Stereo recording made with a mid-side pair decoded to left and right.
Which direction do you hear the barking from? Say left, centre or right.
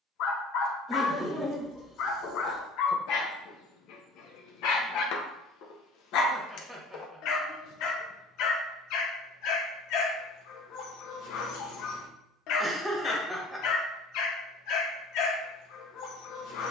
left.